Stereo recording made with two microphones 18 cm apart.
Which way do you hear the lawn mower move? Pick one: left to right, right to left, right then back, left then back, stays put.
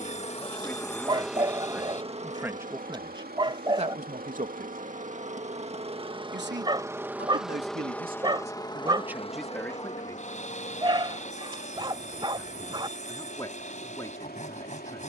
right then back.